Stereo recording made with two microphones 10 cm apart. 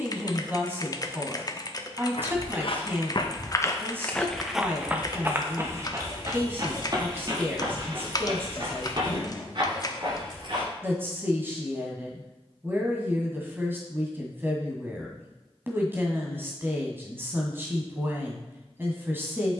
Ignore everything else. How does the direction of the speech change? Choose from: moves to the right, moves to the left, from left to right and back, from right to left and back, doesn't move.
doesn't move.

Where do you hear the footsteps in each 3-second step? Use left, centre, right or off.
left, centre, right, right, off, off, off.